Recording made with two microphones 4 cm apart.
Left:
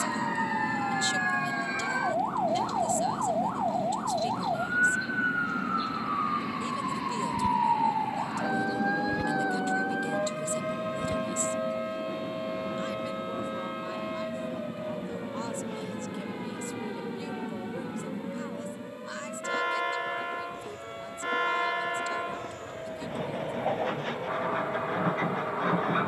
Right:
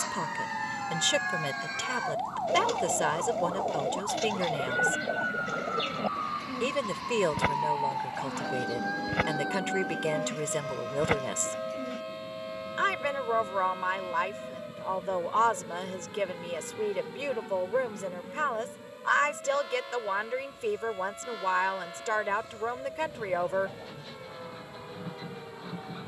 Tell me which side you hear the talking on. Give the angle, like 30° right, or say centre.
60° right.